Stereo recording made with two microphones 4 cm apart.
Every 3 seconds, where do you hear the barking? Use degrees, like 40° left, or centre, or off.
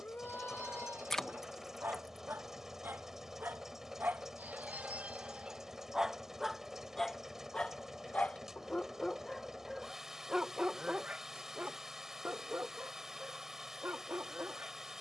60° right, 40° right, 10° left, 20° right, 60° right.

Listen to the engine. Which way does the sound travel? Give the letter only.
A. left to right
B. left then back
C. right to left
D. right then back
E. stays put
E.